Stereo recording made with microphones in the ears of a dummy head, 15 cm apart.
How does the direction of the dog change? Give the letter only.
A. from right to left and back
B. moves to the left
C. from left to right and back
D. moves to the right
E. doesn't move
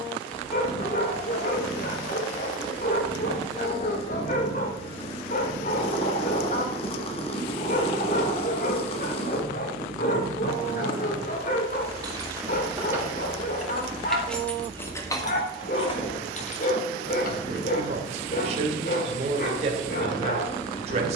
E.